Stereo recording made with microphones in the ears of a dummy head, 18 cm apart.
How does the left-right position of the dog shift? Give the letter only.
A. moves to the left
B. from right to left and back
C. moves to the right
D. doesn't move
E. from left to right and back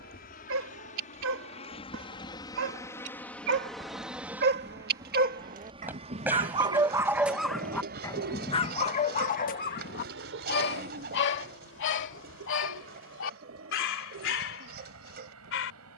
A.